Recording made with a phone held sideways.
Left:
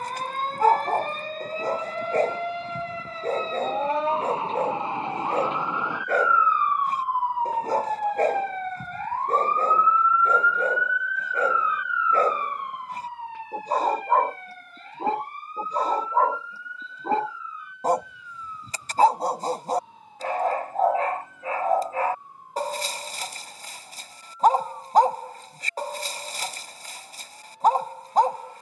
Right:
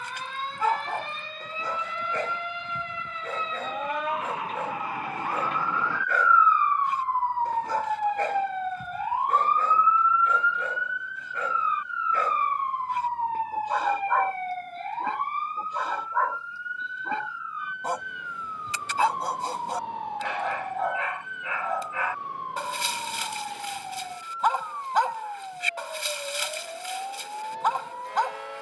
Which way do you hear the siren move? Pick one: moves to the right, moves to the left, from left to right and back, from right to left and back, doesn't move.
moves to the right.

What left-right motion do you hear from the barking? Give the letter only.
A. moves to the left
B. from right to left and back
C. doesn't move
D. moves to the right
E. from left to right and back
C.